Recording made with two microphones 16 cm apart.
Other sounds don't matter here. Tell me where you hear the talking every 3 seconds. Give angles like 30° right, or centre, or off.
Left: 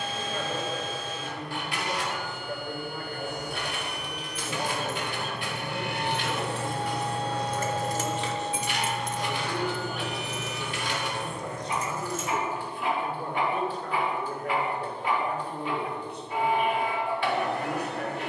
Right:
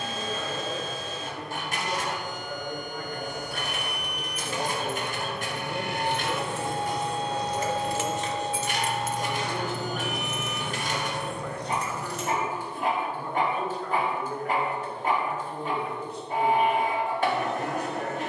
70° left, 10° left, 20° right, 10° left, 50° left, 60° left.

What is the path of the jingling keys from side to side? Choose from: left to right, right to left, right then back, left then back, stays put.
left to right.